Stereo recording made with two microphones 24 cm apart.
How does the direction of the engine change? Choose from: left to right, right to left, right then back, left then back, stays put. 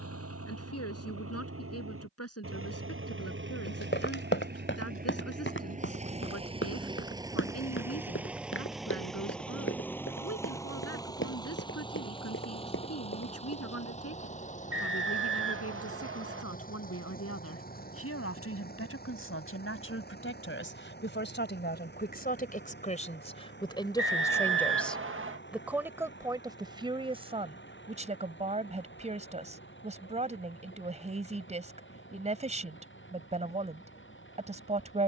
right to left.